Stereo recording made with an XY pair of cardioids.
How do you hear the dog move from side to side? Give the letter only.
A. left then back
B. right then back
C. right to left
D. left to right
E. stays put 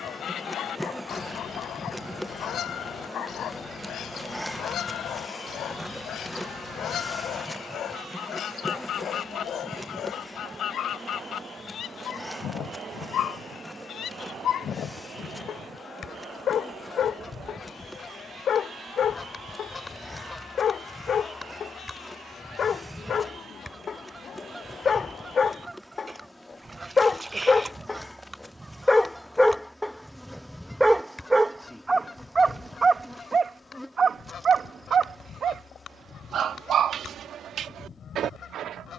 D.